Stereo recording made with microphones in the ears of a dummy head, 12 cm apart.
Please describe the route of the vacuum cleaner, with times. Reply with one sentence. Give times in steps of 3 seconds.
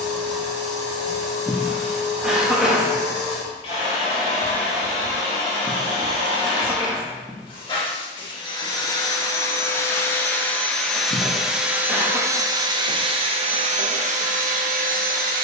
In this clip you hear the vacuum cleaner on the left from 0 s, in the centre from 9 s and on the right from 12 s.